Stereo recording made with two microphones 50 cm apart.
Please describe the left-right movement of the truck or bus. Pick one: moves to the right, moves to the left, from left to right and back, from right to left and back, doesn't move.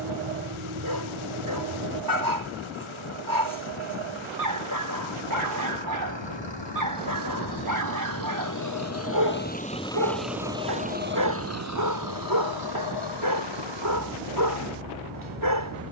moves to the right.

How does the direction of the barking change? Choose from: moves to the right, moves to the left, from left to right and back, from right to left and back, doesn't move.
doesn't move.